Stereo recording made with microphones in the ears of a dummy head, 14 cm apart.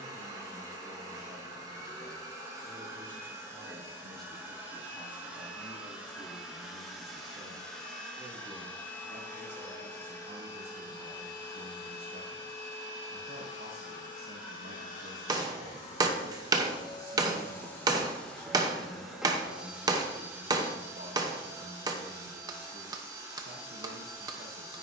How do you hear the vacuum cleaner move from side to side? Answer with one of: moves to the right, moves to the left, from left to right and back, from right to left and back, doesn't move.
from right to left and back.